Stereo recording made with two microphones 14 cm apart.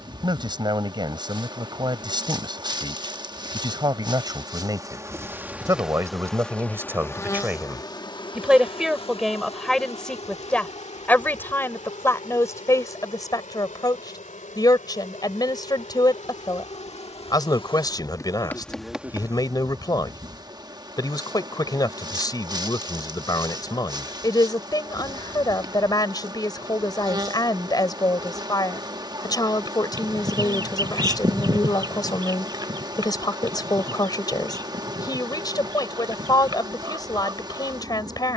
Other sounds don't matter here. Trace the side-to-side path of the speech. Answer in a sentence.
You can hear the speech go from the right side to the left.